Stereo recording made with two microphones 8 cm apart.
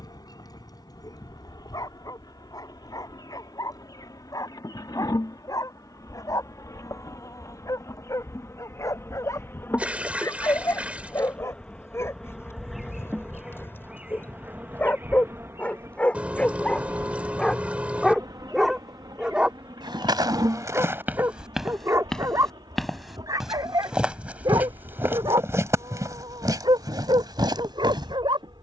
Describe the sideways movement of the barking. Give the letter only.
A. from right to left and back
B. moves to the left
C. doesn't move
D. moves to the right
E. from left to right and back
D.